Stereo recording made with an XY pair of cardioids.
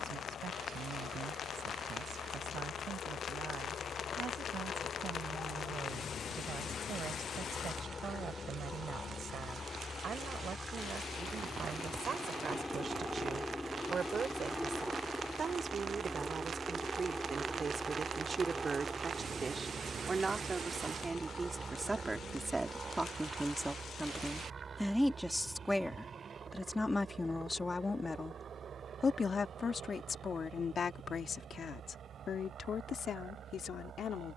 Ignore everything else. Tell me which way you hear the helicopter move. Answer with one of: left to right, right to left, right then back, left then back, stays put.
left to right.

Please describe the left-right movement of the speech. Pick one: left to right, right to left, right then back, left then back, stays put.
right to left.